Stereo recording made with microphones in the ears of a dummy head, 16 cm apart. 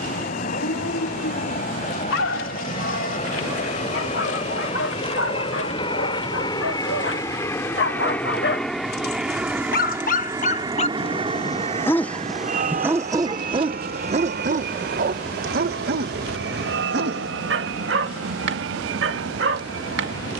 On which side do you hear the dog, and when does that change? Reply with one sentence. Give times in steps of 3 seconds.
In this clip you hear the dog on the left from 0 s and on the right from 12 s.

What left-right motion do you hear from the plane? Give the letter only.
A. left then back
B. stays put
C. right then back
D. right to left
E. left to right
E.